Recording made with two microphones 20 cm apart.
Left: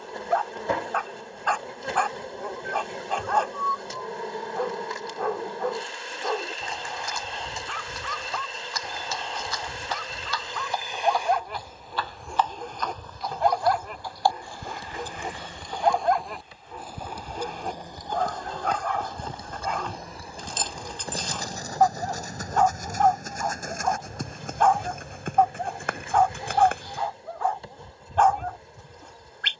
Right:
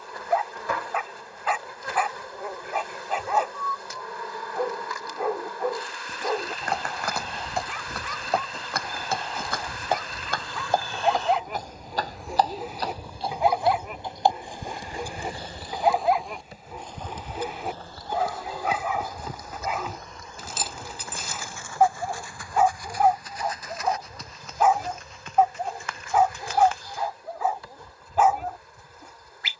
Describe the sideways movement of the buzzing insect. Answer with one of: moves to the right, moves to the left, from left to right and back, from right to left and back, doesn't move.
from left to right and back.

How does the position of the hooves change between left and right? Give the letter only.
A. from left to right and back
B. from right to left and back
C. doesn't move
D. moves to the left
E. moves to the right
D.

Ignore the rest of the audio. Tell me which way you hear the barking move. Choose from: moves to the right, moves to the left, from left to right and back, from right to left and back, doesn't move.
doesn't move.